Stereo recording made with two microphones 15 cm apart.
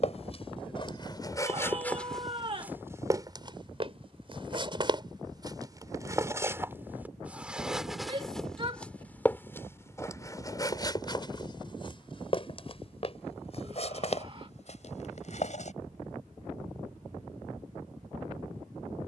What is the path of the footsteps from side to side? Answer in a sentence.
You can hear the footsteps move from left to right and back again.